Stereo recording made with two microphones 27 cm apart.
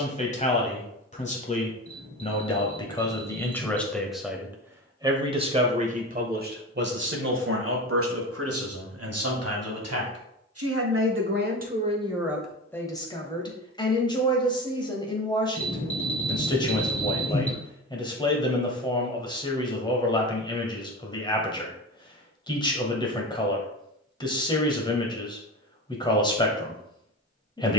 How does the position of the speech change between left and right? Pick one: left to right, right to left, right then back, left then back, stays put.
right then back.